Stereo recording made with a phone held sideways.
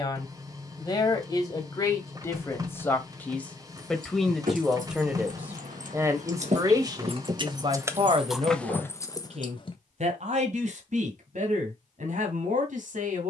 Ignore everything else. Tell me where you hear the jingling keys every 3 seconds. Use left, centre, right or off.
off, right, right, left, off.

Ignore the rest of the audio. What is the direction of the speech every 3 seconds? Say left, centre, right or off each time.
left, centre, right, right, right.